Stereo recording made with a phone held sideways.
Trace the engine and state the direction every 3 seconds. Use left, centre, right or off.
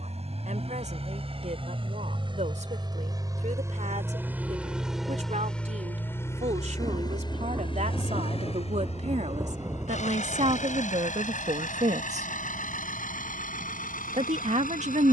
right, centre, left, left, left.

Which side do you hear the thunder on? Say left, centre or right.
right.